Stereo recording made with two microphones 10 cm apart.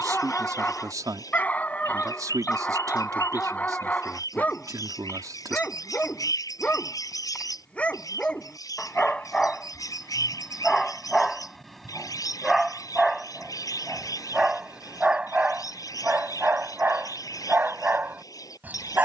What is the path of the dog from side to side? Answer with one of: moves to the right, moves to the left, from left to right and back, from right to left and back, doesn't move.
moves to the right.